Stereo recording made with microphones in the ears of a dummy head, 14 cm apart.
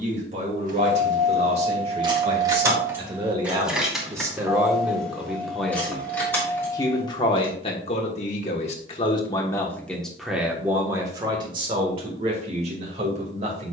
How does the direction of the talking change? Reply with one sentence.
You can hear the talking go left and come back.